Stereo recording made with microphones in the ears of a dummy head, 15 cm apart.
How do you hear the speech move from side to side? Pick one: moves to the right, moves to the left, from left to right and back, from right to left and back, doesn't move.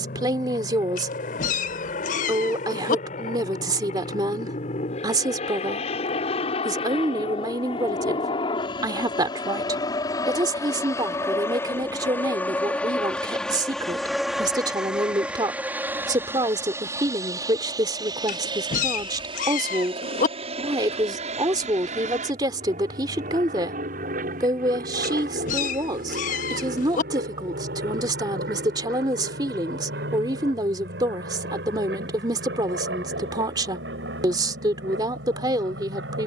doesn't move.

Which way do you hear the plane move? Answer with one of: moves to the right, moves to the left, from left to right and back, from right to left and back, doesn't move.
moves to the right.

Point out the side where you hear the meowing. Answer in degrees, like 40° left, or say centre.
50° left.